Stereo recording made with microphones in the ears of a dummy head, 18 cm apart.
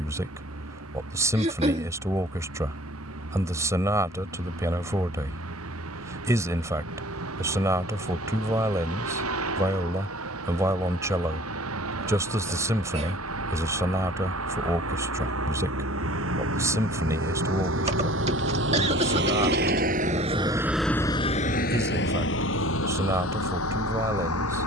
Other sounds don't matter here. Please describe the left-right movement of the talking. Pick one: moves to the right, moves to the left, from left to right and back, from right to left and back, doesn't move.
doesn't move.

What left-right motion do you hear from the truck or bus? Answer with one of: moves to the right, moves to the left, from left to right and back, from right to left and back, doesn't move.
moves to the left.